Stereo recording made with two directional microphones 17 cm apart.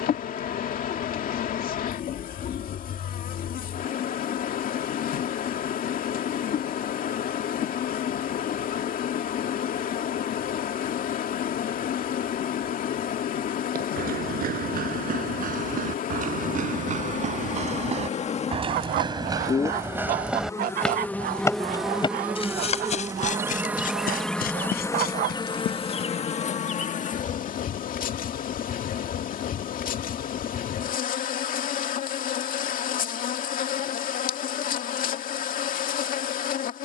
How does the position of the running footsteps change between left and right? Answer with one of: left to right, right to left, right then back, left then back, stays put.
right to left.